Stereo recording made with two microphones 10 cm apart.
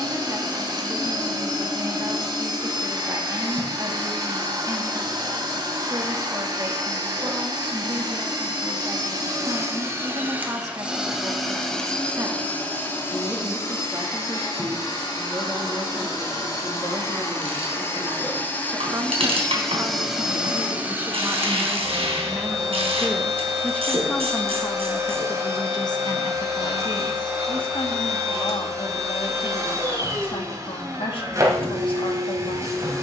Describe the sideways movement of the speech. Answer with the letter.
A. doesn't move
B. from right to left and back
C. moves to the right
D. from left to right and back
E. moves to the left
E.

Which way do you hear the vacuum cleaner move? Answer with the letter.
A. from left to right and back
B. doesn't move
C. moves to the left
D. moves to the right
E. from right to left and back
E.